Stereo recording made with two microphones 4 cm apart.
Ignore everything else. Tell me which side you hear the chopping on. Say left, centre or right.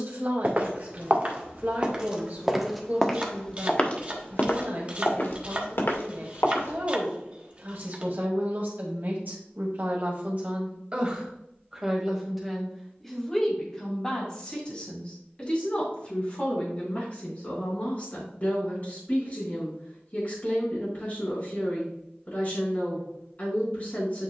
right.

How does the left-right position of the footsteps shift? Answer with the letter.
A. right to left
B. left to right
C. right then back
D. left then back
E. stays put
A.